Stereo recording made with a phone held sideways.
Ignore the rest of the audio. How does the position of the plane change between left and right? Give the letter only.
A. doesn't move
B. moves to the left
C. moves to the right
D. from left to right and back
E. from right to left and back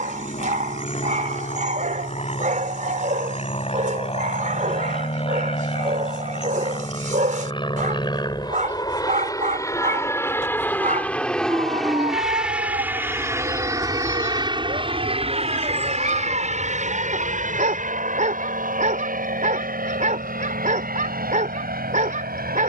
C.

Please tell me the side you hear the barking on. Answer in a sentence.
In this clip you hear the barking on the right.